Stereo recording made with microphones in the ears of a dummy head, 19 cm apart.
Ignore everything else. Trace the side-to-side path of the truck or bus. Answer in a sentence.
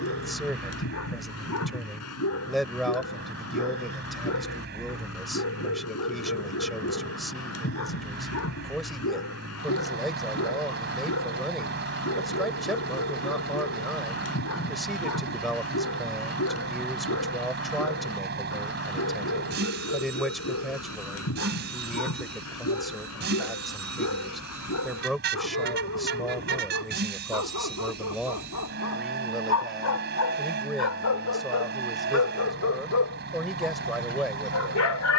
In this clip you hear the truck or bus stay put.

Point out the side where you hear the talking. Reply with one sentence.
In this clip you hear the talking in the centre.